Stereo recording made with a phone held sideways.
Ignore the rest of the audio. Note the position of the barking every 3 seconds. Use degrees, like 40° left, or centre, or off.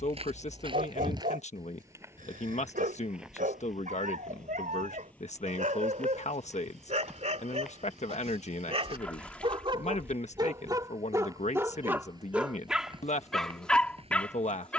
60° right, 50° right, 40° right, 20° right, centre.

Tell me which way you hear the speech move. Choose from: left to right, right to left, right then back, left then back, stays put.
stays put.